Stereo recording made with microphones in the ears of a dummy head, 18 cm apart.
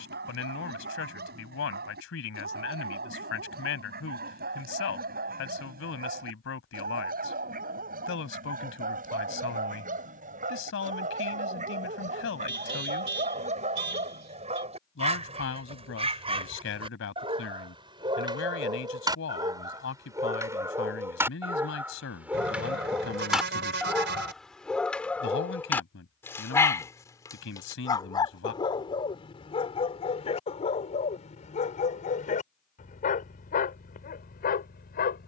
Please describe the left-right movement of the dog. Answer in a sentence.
You can hear the dog travel towards the left.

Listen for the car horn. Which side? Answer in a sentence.
You can hear the car horn on the right.